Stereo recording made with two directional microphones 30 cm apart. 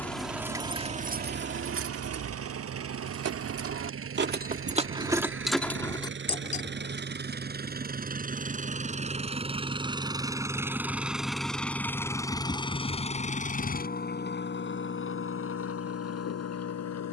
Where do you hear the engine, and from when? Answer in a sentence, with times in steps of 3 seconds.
You can hear the engine on the right from 0 s, in the centre from 9 s and on the left from 12 s.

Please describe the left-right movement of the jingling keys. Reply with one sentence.
You can hear the jingling keys go right and come back.